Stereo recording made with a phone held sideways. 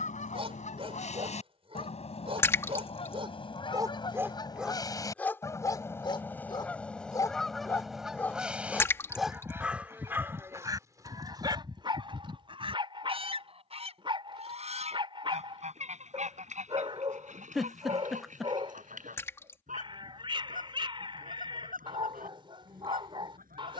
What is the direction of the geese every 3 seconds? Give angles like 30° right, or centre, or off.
40° left, 30° left, centre, 20° right, 40° right, 50° right, 60° right, 60° right.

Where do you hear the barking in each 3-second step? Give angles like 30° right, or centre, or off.
40° right, 10° right, 20° left, 20° right, 30° right, 30° right, 30° right, 30° right.